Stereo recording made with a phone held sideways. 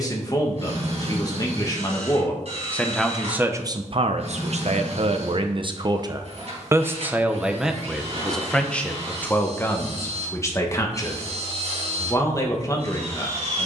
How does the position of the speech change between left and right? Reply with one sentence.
In this clip you hear the speech go right and come back.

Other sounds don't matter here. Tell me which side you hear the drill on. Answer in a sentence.
You can hear the drill on the right.